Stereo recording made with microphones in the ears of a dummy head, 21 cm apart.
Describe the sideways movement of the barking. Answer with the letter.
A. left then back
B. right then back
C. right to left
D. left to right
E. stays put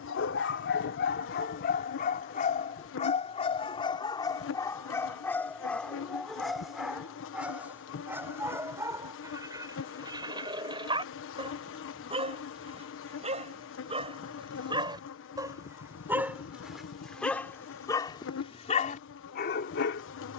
B.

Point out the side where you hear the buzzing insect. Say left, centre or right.
left.